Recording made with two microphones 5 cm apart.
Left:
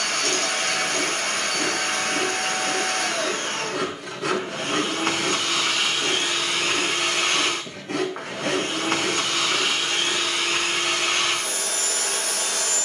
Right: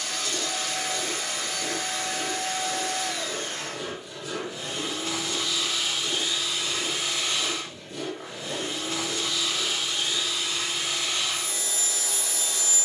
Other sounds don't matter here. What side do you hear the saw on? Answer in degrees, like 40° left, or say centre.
80° left.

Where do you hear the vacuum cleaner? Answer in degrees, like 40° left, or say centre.
60° left.